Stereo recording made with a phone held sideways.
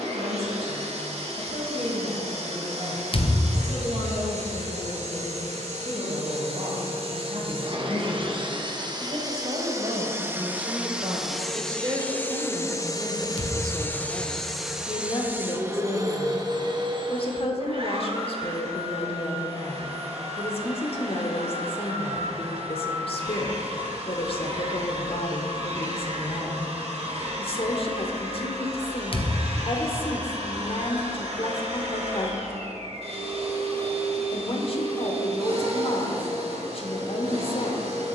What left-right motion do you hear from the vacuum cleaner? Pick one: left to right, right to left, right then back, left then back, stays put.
left then back.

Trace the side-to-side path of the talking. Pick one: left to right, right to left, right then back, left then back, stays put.
right to left.